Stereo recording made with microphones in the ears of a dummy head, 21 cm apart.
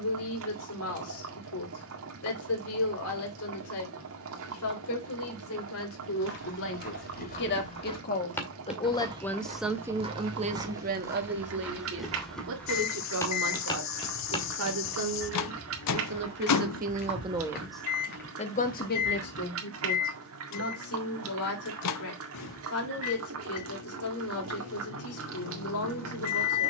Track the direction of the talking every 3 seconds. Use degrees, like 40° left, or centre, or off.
70° left, 70° left, 50° left, 30° right, 70° right, 40° right, 50° left, 70° left, 70° left.